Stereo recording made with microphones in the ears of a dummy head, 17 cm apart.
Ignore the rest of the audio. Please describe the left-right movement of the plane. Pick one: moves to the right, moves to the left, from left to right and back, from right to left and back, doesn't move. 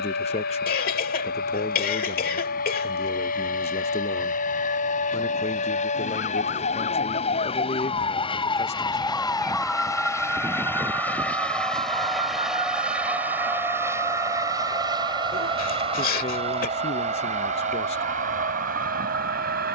moves to the right.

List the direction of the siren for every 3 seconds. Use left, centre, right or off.
left, left, left, centre, right, right, right.